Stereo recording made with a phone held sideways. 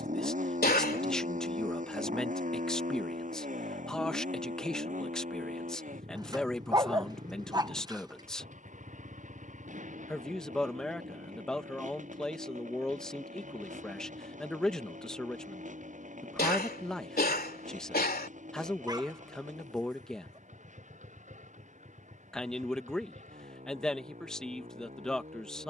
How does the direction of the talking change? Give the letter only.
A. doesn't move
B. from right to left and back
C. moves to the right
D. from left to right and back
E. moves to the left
A.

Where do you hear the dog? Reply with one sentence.
In this clip you hear the dog on the right.